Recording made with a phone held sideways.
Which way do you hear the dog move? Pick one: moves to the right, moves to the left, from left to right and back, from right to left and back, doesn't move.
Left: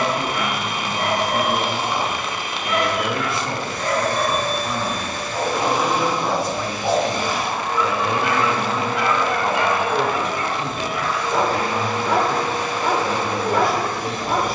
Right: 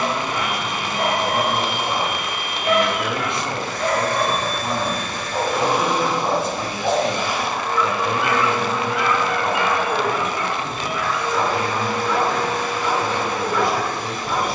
moves to the left.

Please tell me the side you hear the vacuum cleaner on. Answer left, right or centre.
left.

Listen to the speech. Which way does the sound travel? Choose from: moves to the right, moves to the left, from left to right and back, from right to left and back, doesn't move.
from left to right and back.